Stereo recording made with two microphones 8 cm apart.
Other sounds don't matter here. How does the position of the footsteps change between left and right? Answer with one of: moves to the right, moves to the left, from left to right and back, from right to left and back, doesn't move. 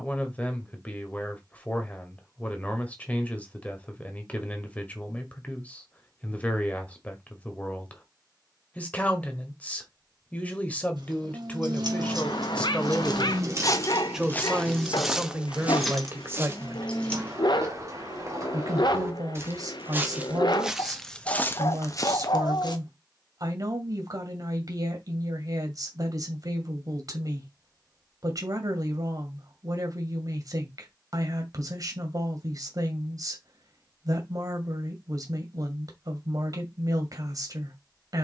from left to right and back.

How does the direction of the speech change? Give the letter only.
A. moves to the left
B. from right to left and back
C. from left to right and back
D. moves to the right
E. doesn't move
D.